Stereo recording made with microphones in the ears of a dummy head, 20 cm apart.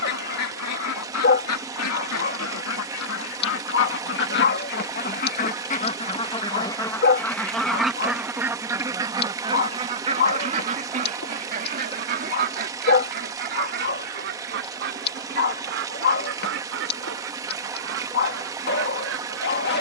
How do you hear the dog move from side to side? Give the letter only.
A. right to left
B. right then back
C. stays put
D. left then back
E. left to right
C.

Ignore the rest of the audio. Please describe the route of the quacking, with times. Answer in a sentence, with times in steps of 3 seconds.
You can hear the quacking on the left from 0 s, in the centre from 6 s and on the right from 9 s.